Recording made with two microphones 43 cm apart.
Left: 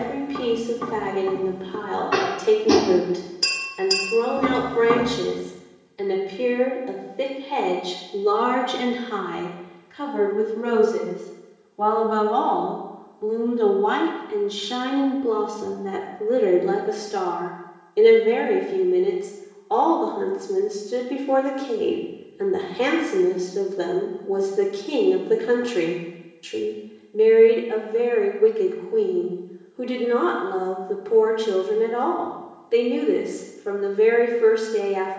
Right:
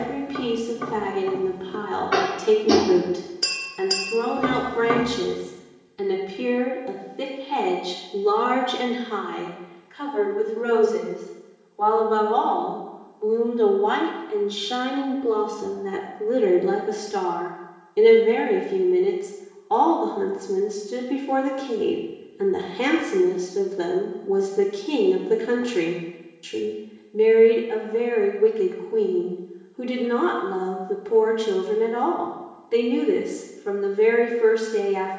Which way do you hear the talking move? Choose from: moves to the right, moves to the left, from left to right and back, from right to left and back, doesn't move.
from right to left and back.